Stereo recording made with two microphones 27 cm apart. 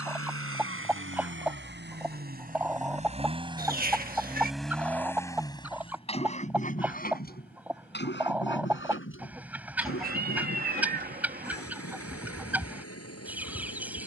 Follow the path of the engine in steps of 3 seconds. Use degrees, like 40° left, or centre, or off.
40° right, centre, 40° left, 50° left, 60° left.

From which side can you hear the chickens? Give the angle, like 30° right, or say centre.
10° right.